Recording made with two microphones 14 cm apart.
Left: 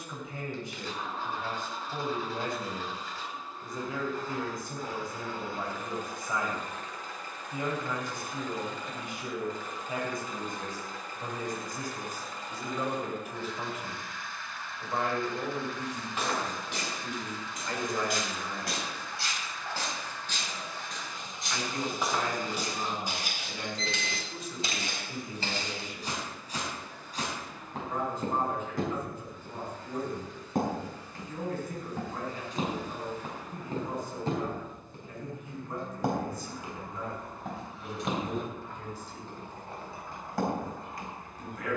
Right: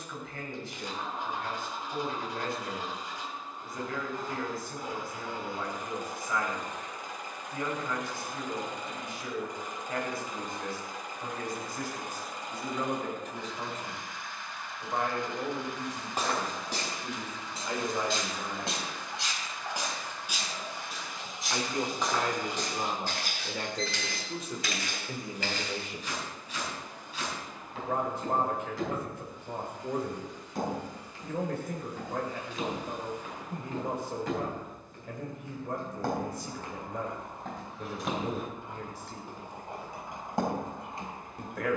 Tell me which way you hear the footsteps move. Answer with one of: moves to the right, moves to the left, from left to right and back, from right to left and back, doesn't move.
from right to left and back.